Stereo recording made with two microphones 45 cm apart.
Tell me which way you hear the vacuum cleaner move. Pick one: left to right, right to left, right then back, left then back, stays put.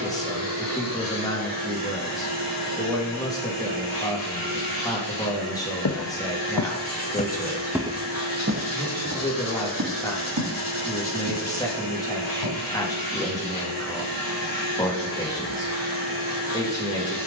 stays put.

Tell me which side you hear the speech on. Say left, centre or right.
centre.